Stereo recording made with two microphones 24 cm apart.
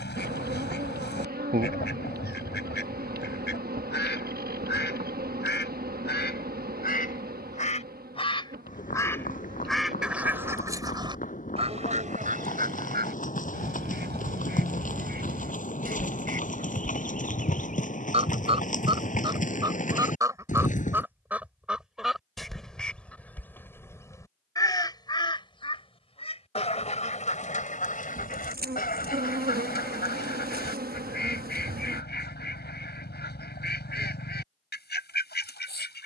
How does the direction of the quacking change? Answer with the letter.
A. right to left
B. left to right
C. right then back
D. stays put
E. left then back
C.